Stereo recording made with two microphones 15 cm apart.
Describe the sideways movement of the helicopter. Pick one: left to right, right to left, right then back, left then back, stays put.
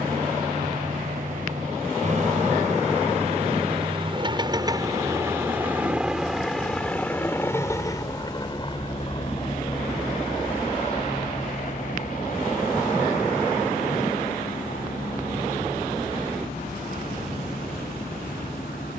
right to left.